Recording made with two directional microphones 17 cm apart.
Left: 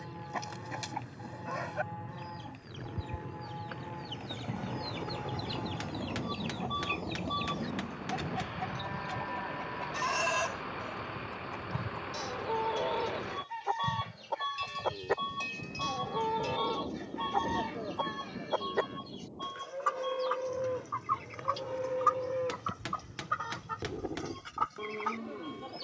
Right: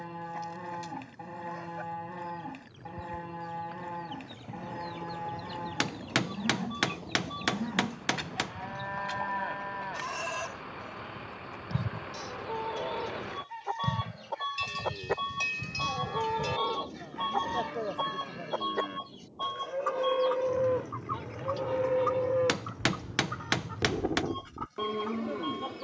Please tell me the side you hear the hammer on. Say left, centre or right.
right.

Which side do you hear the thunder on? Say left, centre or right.
left.